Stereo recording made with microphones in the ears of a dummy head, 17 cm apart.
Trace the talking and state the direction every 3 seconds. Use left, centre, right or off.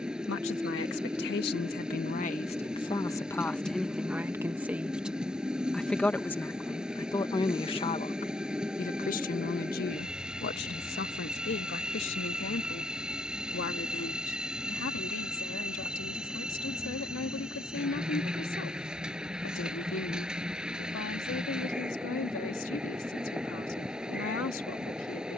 left, centre, left, left, left, left, left, left, left.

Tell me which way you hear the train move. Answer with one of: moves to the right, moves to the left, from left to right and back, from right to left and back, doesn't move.
doesn't move.